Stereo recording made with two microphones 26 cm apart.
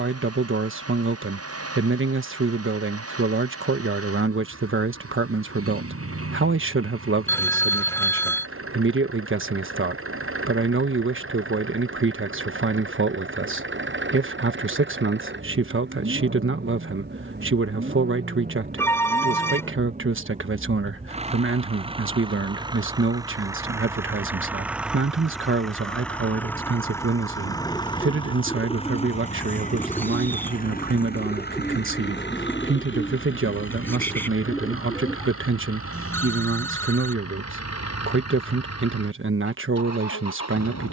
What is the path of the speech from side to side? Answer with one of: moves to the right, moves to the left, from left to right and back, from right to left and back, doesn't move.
doesn't move.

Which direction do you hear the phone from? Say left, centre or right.
centre.